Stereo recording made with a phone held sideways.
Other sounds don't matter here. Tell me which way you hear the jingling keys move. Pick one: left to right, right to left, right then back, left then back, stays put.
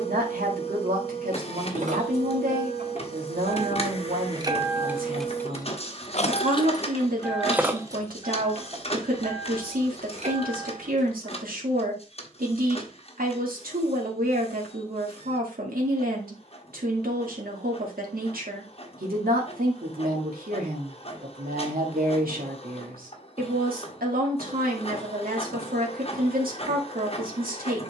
left then back.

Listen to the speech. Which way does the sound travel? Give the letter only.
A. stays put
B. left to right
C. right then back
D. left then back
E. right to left
A.